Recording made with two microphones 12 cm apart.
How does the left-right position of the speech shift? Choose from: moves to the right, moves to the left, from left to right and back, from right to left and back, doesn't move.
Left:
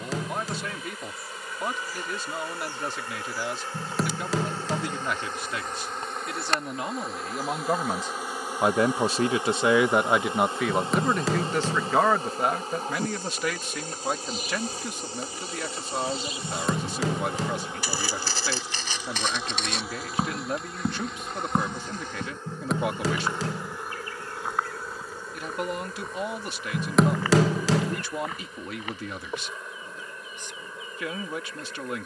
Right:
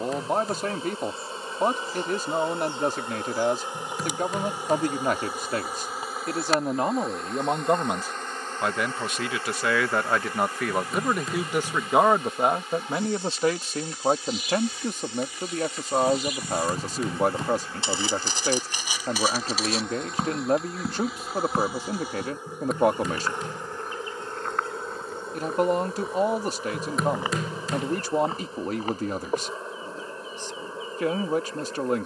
from right to left and back.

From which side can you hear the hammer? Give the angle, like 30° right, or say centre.
80° left.